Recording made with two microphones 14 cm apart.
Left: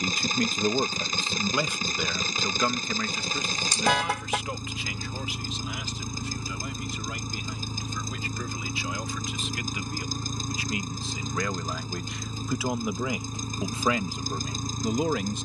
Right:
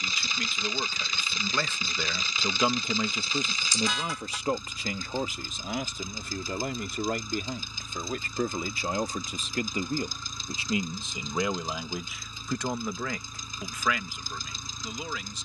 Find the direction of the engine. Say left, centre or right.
left.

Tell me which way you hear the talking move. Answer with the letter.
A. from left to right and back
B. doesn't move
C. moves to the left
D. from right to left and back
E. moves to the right
A.